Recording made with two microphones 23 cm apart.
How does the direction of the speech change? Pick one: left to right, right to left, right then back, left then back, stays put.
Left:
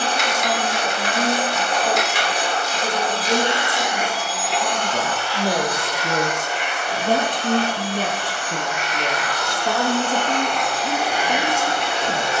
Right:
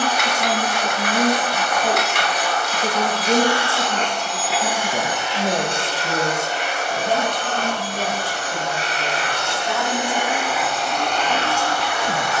left then back.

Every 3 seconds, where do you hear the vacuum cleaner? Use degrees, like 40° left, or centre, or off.
30° left, centre, 40° right, 10° right.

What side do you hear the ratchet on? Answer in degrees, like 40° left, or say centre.
60° right.